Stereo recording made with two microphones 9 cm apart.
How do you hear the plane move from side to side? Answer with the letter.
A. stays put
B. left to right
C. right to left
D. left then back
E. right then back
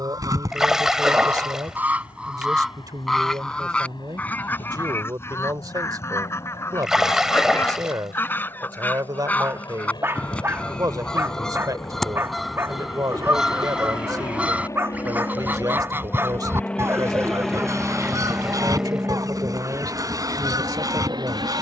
B.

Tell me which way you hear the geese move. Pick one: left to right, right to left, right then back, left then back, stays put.
left then back.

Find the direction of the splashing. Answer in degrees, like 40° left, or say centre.
10° right.